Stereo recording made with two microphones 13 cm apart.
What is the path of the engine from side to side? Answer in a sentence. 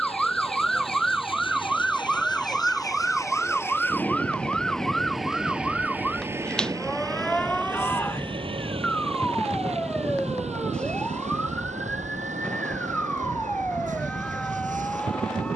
In this clip you hear the engine move from left to right.